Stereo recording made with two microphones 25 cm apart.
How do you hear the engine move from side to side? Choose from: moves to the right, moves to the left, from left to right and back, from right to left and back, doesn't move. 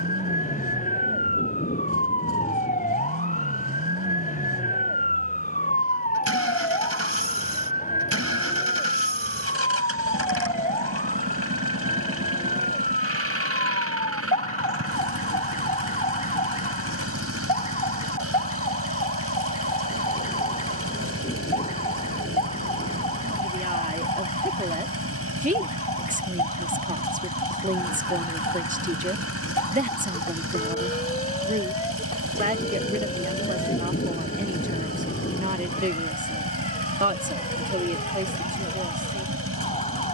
doesn't move.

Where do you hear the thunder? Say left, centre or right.
left.